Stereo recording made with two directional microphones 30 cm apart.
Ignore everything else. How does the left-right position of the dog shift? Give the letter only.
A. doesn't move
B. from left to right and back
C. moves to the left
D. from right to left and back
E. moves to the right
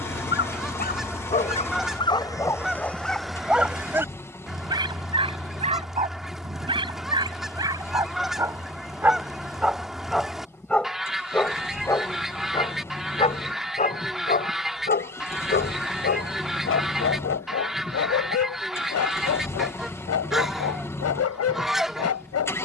B.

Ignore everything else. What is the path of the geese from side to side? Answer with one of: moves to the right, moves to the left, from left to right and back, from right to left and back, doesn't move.
doesn't move.